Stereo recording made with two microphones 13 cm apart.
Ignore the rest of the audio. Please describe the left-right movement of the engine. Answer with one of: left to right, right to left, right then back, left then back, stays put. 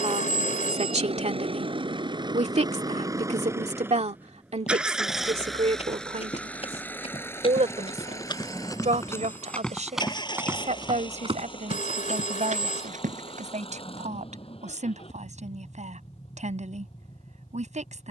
right to left.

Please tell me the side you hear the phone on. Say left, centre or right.
left.